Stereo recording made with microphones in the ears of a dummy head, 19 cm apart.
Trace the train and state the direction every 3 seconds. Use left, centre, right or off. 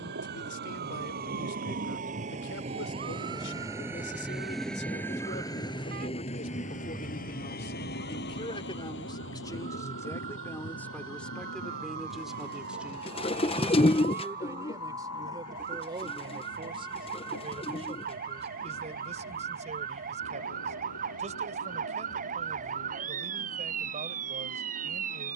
right, centre, left, left, left, left, left, left, left.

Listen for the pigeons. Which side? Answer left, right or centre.
left.